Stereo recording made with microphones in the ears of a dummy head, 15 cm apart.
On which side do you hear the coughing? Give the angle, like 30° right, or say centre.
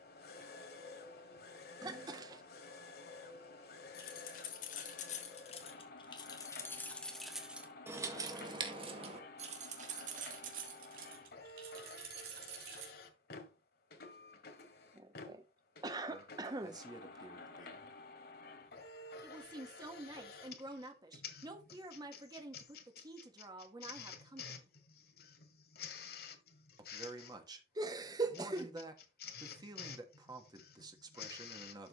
20° right.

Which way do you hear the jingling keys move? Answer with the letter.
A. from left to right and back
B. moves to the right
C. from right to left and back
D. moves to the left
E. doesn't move
B.